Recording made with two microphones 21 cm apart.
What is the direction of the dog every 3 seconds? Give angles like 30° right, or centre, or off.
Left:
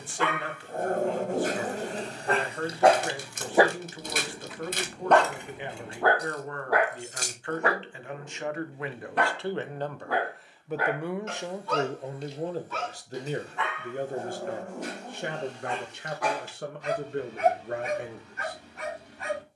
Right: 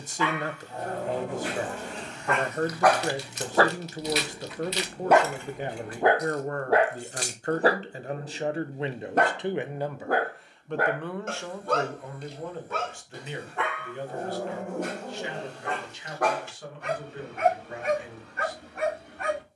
40° left, centre, 30° right, 50° right, 60° right, 60° right, 60° right.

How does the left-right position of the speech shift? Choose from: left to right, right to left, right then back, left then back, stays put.
right to left.